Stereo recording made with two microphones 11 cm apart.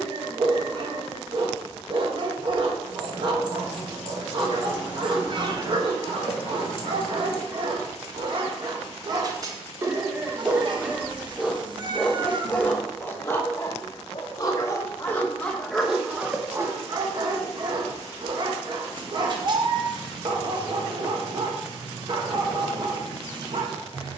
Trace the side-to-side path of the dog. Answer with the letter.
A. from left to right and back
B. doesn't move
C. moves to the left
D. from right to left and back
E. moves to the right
D.